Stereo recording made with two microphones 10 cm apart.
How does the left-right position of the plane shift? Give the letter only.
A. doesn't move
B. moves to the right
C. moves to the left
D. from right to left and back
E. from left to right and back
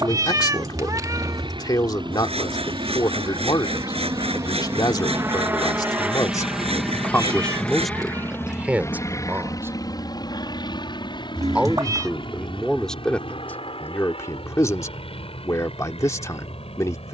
C.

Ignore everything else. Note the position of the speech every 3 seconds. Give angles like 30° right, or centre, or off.
40° left, 40° left, 10° left, 20° right, 20° left, 30° left.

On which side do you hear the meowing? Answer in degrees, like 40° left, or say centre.
40° right.